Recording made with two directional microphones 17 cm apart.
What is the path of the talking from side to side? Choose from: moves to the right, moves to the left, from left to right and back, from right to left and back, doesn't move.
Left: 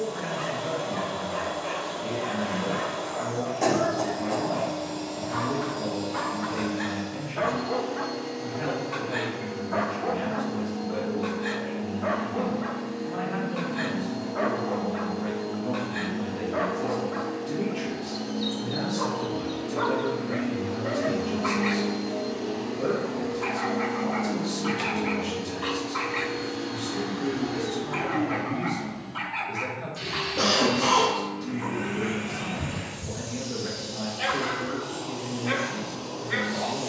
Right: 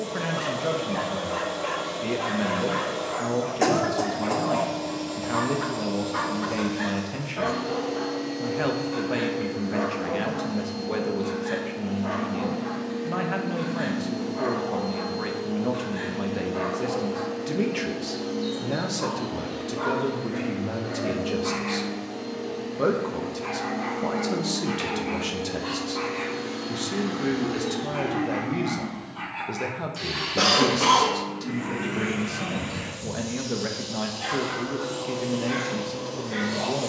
doesn't move.